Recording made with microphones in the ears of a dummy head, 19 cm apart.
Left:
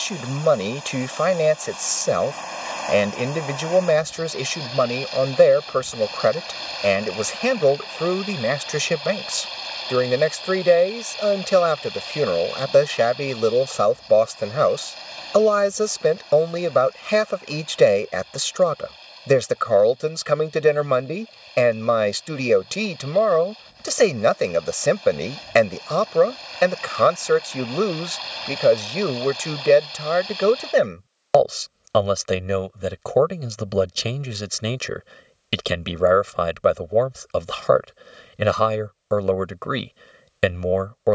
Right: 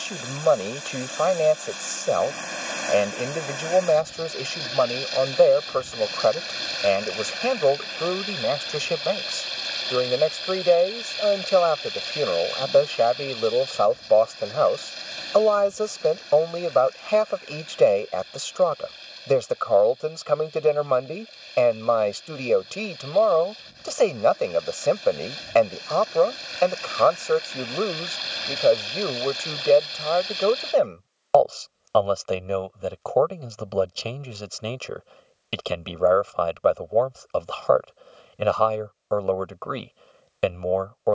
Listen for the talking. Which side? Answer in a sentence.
You can hear the talking on the left.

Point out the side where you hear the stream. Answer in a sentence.
You can hear the stream on the right.